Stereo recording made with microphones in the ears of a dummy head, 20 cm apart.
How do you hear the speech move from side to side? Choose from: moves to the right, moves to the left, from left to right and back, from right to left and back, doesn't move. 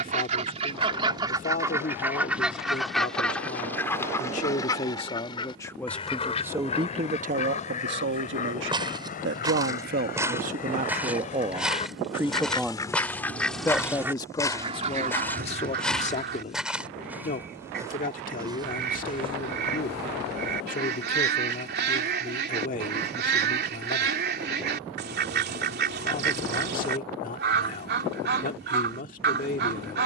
from left to right and back.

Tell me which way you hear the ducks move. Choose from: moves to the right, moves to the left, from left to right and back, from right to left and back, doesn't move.
from right to left and back.